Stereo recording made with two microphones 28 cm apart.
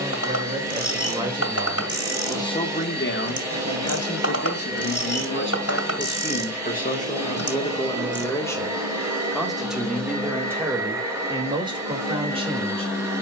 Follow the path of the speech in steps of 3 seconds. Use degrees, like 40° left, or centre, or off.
10° right, 50° left, 20° left, 10° right, 20° right.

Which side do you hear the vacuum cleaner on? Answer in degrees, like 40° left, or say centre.
10° right.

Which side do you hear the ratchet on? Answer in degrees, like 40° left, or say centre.
60° left.